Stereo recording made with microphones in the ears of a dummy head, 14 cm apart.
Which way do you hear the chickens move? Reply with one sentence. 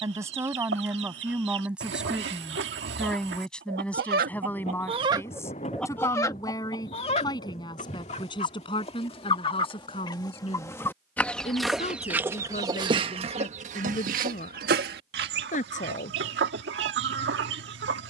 In this clip you hear the chickens go left and come back.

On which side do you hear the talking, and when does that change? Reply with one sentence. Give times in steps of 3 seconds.
In this clip you hear the talking in the centre from 0 s and on the left from 6 s.